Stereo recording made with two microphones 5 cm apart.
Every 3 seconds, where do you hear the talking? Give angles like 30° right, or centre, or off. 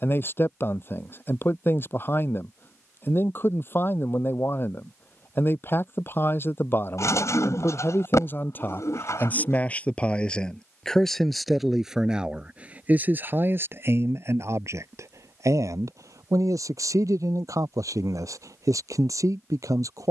40° left, 40° left, 40° left, 10° left, 40° right, 70° right, 70° right.